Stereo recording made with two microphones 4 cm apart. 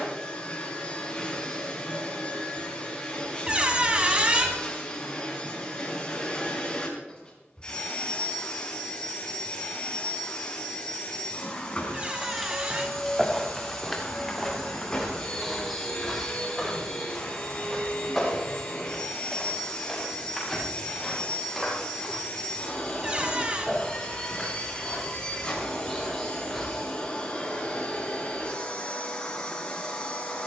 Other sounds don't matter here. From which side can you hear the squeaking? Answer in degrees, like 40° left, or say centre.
30° right.